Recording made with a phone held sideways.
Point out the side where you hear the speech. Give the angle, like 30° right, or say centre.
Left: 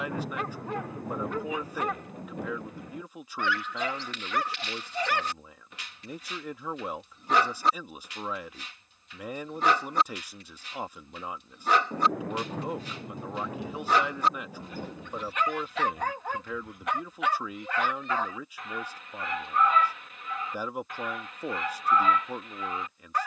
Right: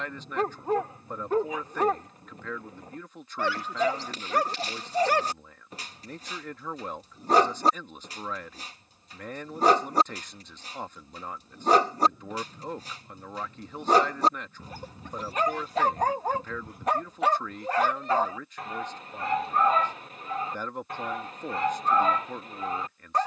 10° left.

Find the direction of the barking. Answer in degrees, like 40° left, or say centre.
40° right.